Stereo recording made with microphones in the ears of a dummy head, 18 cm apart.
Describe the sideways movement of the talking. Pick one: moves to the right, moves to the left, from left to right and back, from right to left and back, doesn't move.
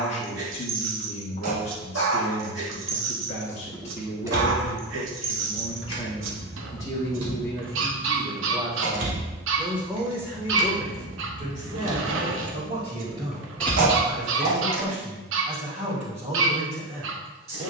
moves to the right.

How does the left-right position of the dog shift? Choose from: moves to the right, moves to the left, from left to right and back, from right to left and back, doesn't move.
doesn't move.